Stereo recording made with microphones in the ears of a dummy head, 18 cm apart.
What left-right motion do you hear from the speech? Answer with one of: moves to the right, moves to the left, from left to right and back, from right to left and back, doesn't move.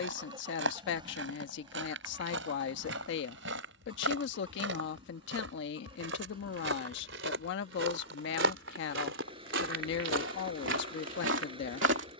doesn't move.